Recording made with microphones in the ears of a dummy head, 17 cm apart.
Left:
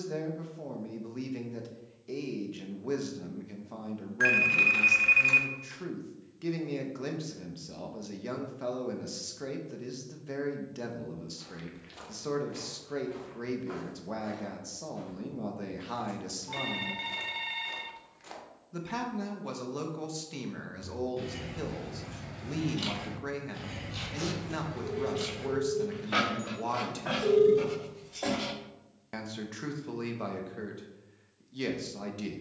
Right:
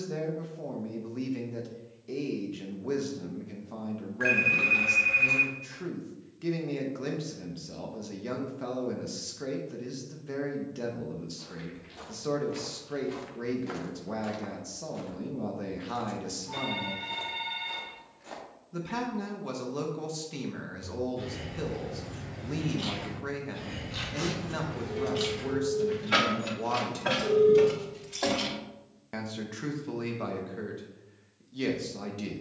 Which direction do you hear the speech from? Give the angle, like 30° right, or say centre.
10° left.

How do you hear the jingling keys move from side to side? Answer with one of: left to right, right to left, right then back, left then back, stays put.
left to right.